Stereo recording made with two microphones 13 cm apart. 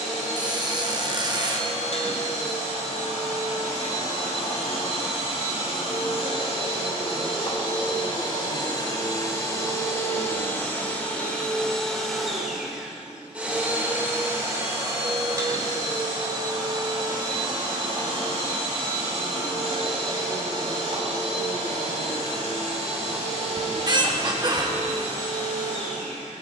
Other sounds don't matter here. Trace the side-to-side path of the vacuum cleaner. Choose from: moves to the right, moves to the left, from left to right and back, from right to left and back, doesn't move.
moves to the right.